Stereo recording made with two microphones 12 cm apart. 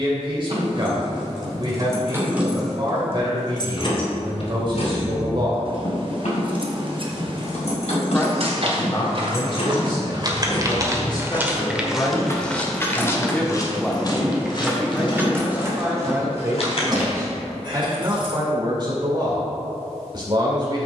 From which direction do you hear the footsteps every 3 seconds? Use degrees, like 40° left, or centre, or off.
off, off, 60° right, 30° right, 30° left, 50° left, off.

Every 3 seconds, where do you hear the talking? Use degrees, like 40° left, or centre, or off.
40° right, 40° right, 30° left, 40° left, 10° left, 20° right, 40° right.